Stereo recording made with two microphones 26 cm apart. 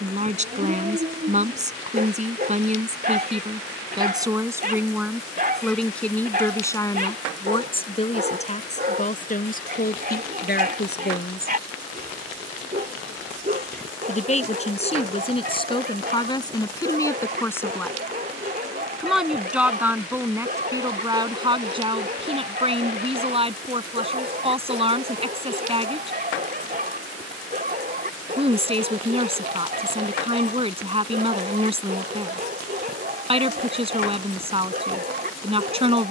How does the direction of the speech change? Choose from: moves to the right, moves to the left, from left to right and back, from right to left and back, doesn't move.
from right to left and back.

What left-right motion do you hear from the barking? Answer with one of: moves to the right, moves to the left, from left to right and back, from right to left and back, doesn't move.
doesn't move.